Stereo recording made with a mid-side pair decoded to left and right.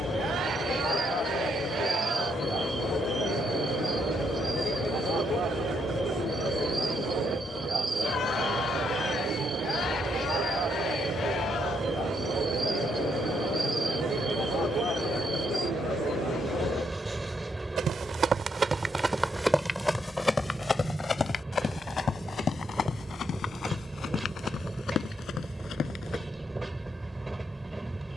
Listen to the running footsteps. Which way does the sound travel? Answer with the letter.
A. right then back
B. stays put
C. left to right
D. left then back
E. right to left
E.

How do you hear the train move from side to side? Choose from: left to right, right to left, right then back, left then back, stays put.
stays put.